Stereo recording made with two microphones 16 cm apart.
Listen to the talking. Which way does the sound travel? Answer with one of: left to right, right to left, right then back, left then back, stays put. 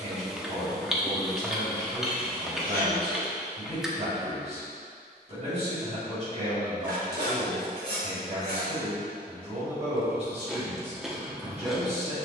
stays put.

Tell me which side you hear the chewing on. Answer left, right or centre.
centre.